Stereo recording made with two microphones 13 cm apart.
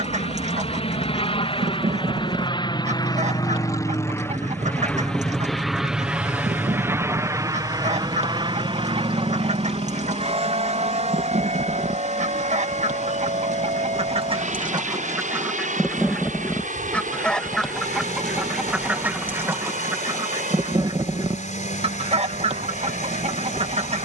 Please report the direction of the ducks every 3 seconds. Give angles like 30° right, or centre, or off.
70° right, 70° right, 70° right, 70° right, 60° right, centre, 20° right, 50° right.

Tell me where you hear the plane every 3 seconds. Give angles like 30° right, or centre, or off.
50° left, 20° left, 20° right, 50° right, 60° right, 70° right, 70° right, 80° right.